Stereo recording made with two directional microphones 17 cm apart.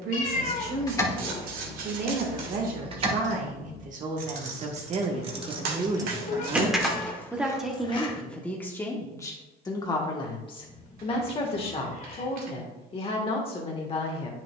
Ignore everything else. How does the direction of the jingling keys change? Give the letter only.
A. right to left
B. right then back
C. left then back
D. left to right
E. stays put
B.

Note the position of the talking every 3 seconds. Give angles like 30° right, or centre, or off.
60° right, 40° right, centre, 30° left, 40° left.